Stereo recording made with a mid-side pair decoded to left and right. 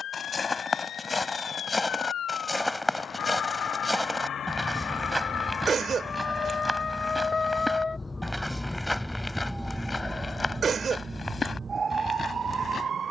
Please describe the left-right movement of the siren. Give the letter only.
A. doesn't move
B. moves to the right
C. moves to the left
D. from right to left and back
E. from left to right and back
B.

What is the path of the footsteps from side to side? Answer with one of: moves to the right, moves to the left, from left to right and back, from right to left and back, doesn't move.
from left to right and back.